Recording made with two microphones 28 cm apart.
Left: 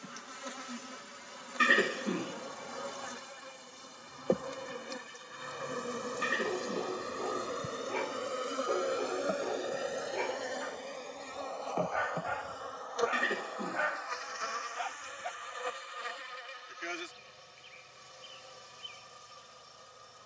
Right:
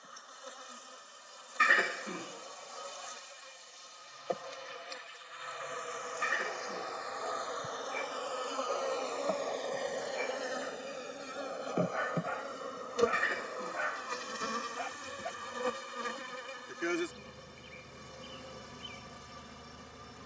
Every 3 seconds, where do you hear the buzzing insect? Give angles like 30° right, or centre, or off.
60° left, 50° left, 30° left, centre, 30° right, 50° right, 60° right.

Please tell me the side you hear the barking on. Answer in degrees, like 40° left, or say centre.
70° left.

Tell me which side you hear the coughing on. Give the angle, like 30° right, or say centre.
40° left.